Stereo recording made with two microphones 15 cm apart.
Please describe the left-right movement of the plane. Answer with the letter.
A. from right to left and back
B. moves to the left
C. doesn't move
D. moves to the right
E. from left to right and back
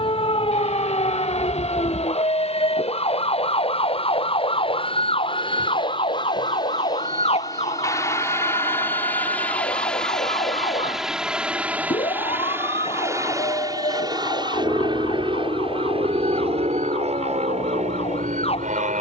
D.